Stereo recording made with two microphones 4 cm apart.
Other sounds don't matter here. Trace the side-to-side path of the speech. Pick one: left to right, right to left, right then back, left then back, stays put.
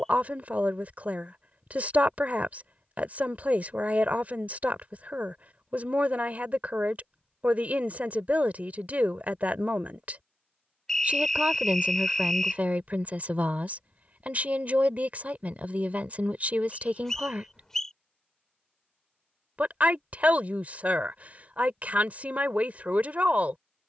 stays put.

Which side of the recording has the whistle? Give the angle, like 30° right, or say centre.
10° left.